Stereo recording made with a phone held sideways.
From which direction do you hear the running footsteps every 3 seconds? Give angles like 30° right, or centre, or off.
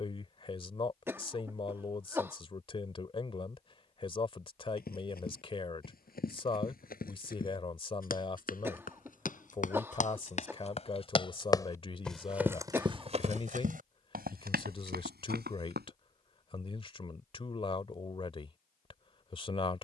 off, 70° left, 60° left, 40° left, 50° right, 80° right, off.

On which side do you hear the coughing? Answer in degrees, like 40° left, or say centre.
10° right.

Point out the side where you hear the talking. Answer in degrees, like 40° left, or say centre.
30° left.